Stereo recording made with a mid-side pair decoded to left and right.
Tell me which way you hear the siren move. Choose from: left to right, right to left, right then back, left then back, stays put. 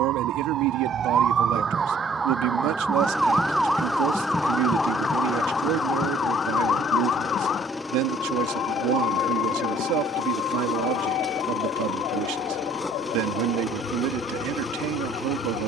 right to left.